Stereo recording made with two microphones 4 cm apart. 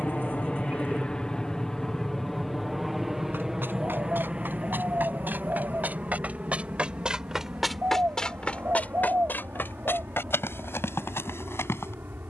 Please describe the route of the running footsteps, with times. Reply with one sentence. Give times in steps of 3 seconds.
In this clip you hear the running footsteps not at all from 0 s, on the right from 3 s, in the centre from 6 s and on the left from 9 s.